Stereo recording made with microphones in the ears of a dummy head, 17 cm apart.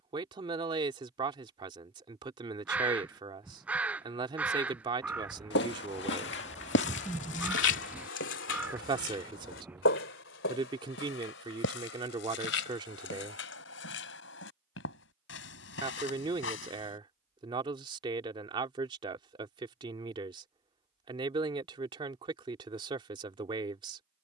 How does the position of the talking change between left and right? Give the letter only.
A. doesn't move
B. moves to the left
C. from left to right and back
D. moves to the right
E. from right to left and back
A.